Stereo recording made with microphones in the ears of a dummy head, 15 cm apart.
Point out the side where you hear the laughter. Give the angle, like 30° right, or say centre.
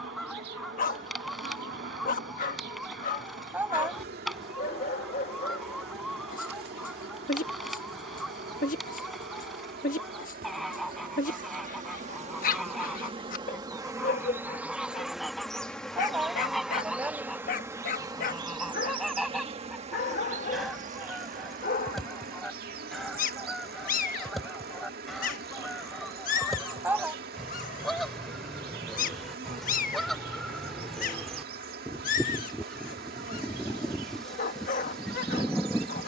10° right.